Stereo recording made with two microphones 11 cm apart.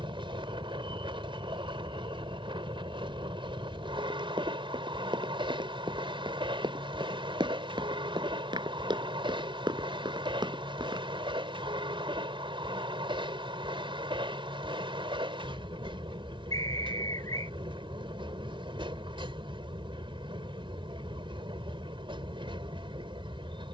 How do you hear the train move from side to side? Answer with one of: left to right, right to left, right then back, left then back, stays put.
stays put.